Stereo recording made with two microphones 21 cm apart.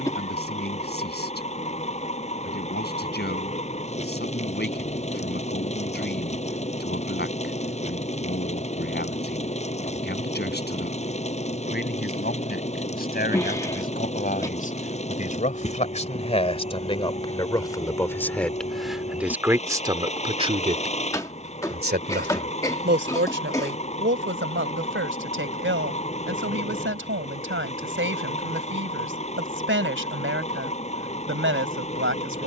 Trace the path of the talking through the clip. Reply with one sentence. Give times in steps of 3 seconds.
You can hear the talking on the left from 0 s, in the centre from 18 s and on the right from 21 s.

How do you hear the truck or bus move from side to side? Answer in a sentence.
In this clip you hear the truck or bus stay put.